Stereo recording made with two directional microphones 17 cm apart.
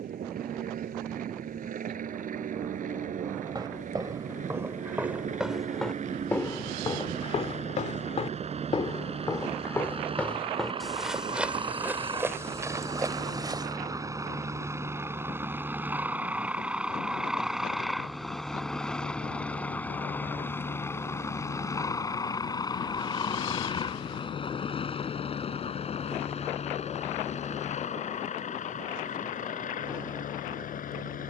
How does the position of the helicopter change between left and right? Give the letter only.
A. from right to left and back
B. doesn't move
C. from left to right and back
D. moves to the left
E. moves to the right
D.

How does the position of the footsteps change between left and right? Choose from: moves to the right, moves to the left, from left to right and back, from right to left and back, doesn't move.
from right to left and back.